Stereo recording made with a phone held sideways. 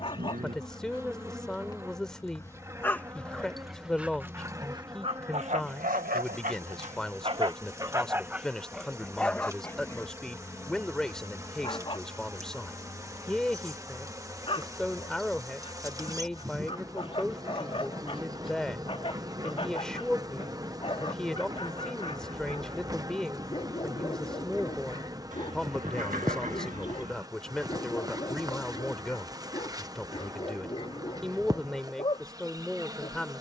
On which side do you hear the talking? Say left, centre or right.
centre.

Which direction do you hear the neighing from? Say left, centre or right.
right.